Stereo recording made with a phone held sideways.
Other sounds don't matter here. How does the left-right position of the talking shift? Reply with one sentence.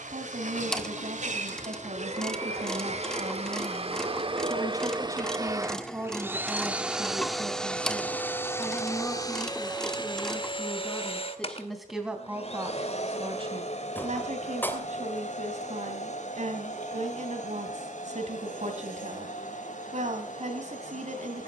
You can hear the talking go left and come back.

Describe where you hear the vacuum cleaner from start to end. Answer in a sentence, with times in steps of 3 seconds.
You can hear the vacuum cleaner on the right from 0 s, in the centre from 6 s and on the left from 9 s.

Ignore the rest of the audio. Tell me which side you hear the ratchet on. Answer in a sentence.
In this clip you hear the ratchet in the centre.